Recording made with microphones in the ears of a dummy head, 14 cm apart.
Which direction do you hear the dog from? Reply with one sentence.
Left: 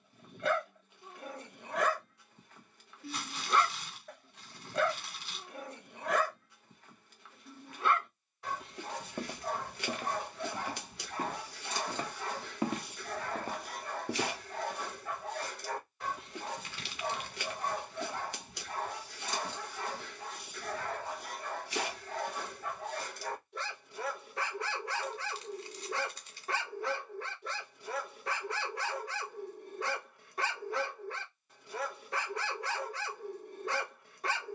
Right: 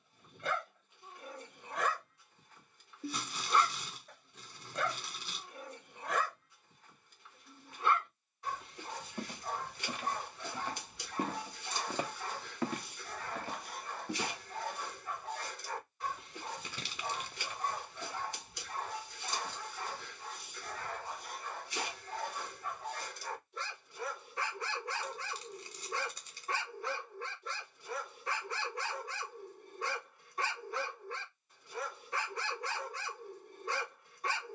In this clip you hear the dog on the left.